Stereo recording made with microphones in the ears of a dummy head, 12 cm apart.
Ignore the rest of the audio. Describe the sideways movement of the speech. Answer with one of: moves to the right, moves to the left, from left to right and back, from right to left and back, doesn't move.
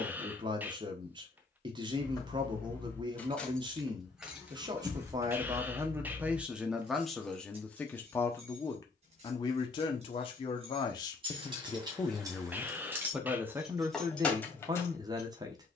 from right to left and back.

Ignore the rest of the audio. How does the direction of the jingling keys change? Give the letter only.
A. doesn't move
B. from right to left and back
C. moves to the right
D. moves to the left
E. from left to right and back
E.